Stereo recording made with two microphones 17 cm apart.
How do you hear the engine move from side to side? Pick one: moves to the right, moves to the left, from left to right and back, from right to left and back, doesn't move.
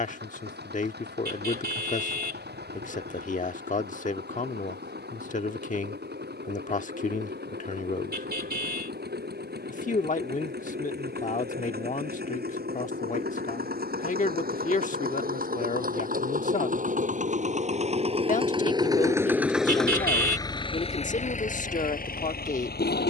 moves to the left.